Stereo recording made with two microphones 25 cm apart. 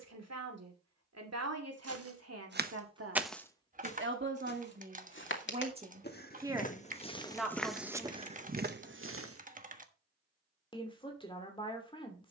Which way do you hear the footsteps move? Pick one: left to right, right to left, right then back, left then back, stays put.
left then back.